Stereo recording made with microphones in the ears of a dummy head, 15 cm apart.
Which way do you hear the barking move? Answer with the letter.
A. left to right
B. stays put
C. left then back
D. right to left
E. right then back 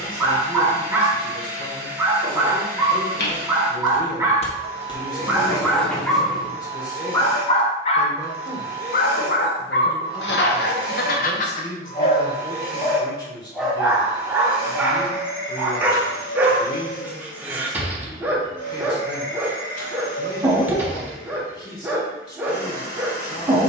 C.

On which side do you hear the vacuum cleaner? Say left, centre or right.
left.